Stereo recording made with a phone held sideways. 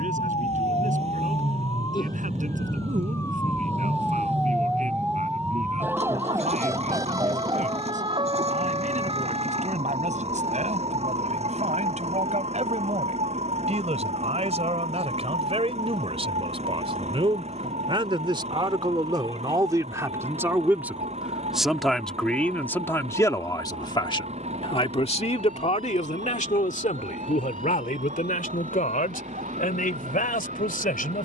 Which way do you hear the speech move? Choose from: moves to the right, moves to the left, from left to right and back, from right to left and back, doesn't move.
moves to the left.